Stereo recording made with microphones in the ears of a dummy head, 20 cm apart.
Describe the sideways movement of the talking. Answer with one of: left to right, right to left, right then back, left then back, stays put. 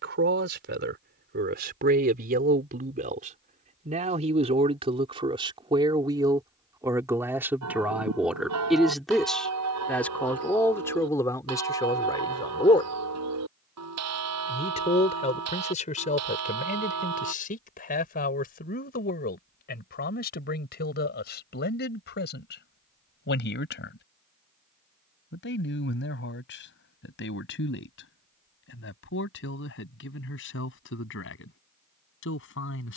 right to left.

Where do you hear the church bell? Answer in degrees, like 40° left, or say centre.
90° right.